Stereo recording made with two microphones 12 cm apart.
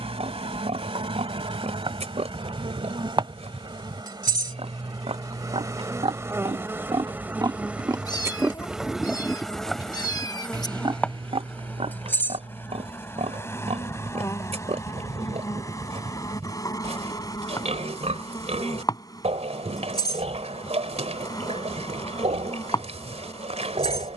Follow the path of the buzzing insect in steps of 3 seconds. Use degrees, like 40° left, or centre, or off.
50° right, 40° right, 10° right, 10° left, 20° left, 30° left, 40° left, 40° left.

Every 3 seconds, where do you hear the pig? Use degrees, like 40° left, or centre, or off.
70° right, 70° right, 40° right, 30° right, 70° right, 70° right, 70° right, 70° right.